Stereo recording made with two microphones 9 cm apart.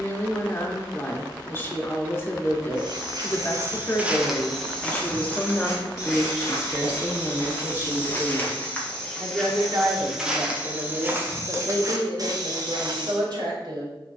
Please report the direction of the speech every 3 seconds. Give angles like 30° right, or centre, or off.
30° left, 20° left, 20° right, 50° right, 60° right.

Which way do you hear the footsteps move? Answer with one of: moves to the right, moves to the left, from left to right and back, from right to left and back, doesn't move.
from right to left and back.